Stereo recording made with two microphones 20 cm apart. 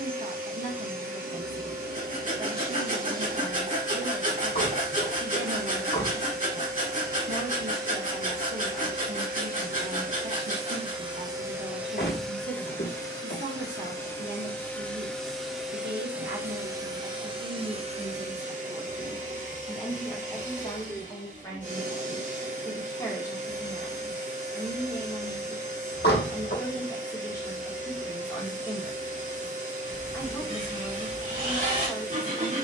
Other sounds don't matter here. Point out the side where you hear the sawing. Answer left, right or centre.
right.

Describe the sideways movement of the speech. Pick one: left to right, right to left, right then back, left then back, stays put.
right to left.